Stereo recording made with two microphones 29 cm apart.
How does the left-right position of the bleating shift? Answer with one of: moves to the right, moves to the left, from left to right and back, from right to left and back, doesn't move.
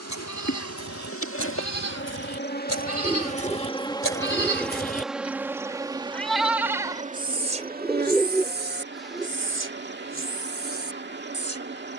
moves to the right.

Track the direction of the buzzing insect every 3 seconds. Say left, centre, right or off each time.
left, centre, right, right.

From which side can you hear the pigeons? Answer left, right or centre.
centre.